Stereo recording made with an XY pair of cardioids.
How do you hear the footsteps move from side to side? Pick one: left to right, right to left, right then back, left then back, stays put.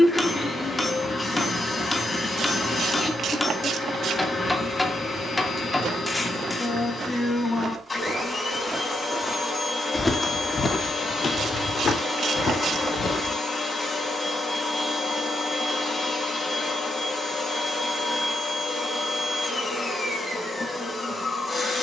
right to left.